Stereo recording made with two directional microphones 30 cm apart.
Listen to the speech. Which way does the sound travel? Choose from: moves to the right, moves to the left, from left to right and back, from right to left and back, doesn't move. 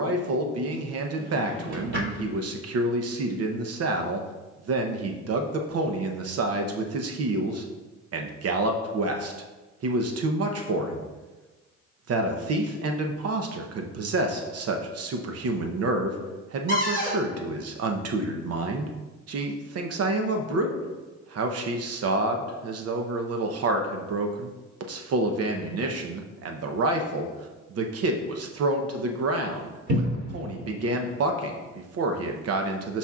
doesn't move.